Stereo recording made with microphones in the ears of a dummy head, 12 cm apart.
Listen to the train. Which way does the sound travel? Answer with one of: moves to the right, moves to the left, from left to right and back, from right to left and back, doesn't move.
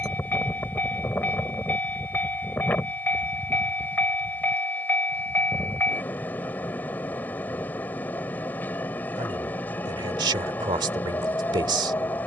doesn't move.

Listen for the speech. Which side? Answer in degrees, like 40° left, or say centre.
30° right.